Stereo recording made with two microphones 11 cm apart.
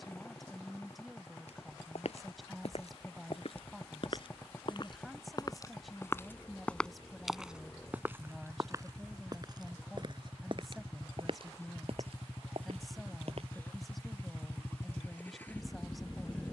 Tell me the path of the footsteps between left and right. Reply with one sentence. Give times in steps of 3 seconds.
In this clip you hear the footsteps on the left from 0 s, in the centre from 6 s, on the right from 9 s and not at all from 15 s.